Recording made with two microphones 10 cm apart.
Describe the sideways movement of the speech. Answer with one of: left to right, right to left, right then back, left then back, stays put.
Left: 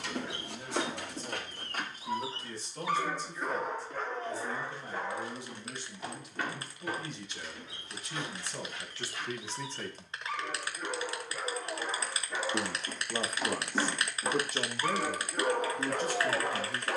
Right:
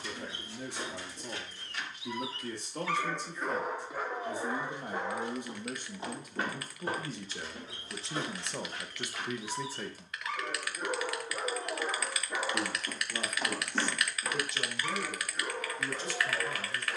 right to left.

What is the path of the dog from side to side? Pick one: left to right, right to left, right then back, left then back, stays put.
right then back.